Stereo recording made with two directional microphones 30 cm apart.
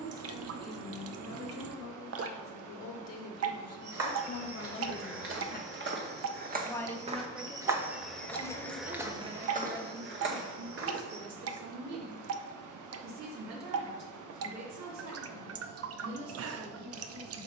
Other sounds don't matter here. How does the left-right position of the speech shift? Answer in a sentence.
In this clip you hear the speech move to the right.